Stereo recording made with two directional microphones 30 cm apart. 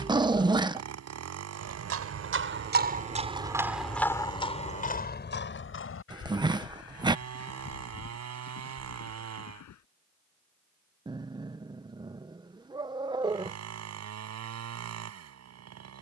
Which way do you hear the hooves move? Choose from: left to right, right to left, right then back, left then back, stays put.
right to left.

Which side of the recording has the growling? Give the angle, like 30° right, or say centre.
10° right.